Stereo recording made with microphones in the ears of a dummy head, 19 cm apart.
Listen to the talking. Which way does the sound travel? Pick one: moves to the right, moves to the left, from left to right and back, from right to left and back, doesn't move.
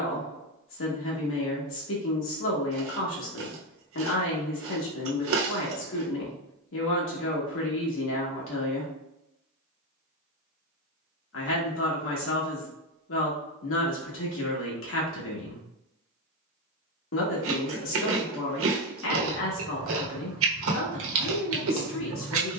doesn't move.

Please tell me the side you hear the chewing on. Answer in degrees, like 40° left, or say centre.
70° right.